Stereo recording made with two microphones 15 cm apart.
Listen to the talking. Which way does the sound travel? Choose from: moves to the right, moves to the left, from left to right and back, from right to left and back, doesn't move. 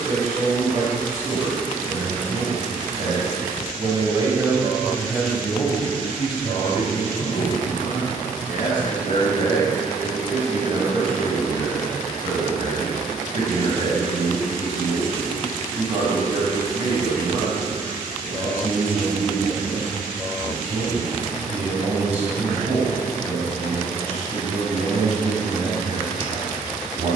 from right to left and back.